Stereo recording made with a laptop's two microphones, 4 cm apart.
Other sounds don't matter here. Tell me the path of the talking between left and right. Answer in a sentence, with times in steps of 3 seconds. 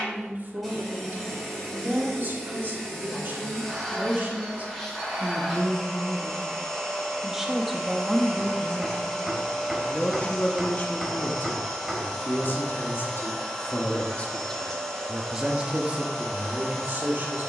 You can hear the talking on the right from 0 s, in the centre from 6 s, on the left from 9 s and on the right from 15 s.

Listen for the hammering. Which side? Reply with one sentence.
In this clip you hear the hammering in the centre.